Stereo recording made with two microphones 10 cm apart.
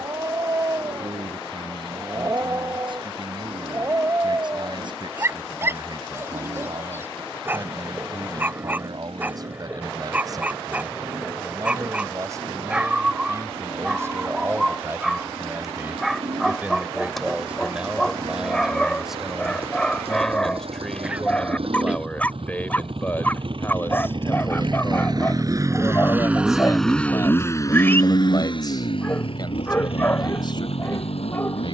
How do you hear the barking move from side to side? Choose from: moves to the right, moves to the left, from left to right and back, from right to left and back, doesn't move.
moves to the left.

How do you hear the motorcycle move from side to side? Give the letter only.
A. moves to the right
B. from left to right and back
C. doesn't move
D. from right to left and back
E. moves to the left
E.